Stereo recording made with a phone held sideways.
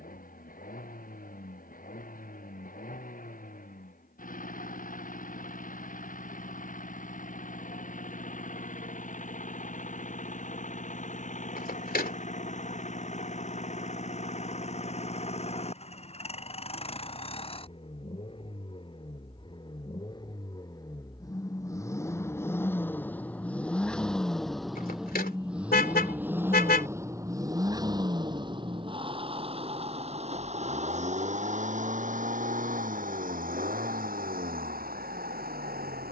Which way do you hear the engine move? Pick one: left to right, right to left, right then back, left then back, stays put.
left to right.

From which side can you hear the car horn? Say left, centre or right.
left.